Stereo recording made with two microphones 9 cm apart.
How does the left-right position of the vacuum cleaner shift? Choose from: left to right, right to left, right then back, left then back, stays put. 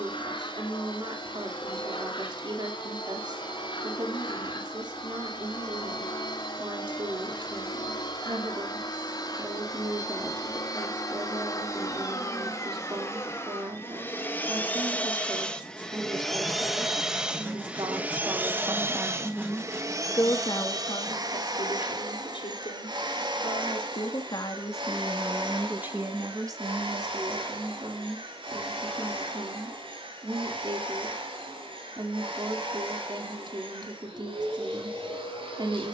left to right.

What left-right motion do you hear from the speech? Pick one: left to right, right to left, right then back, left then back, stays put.
left then back.